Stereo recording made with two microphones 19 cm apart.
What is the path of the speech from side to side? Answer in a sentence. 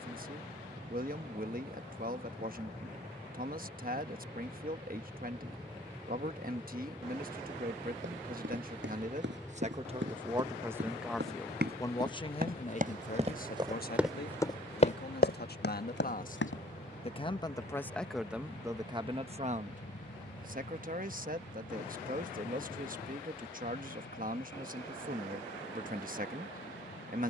You can hear the speech move from right to left and back again.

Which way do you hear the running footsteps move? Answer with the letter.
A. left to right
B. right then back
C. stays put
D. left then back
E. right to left
E.